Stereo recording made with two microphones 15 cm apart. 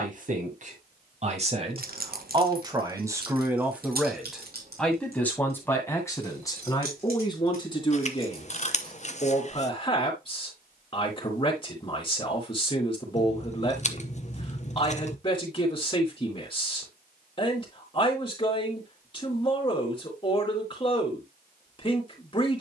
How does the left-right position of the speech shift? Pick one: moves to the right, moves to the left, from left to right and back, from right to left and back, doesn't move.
moves to the left.